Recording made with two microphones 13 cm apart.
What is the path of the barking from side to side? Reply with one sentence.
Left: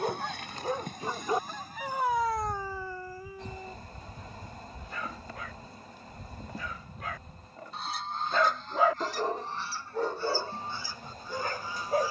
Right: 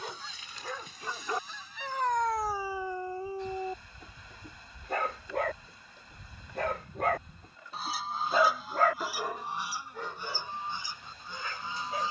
In this clip you hear the barking move from left to right and back again.